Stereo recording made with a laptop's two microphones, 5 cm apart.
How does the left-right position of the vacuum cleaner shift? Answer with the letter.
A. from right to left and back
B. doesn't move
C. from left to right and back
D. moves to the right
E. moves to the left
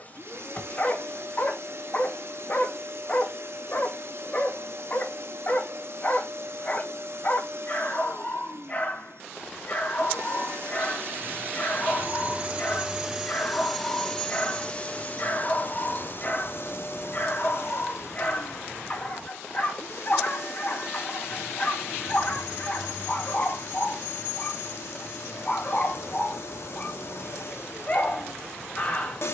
E.